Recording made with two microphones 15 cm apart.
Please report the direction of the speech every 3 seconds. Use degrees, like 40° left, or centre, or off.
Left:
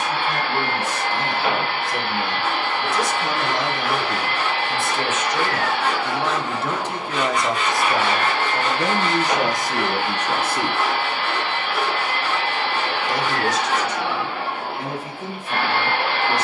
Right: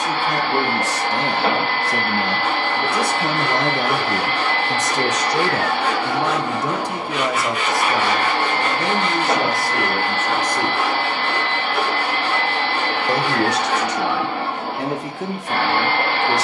70° right, 50° right, 10° right, 10° left, 70° right, 80° right.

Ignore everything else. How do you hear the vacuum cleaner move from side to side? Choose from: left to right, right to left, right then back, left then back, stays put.
stays put.